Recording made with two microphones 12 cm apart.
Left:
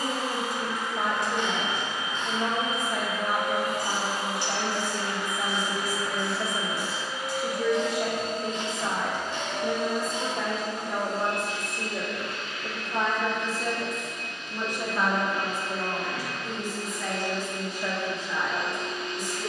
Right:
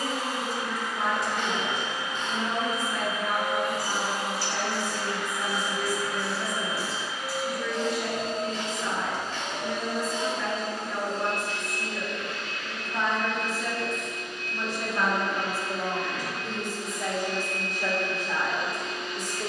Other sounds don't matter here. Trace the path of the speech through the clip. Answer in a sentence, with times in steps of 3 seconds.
In this clip you hear the speech on the left from 0 s and on the right from 15 s.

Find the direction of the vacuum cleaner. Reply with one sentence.
You can hear the vacuum cleaner on the left.